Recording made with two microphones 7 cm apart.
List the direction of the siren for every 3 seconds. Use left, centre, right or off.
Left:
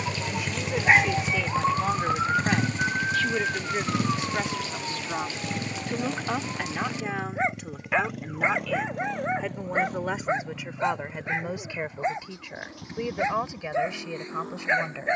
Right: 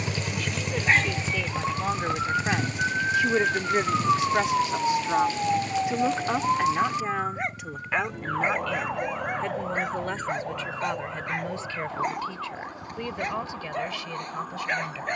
left, right, right, right, right.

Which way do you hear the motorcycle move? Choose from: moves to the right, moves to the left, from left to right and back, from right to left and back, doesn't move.
moves to the left.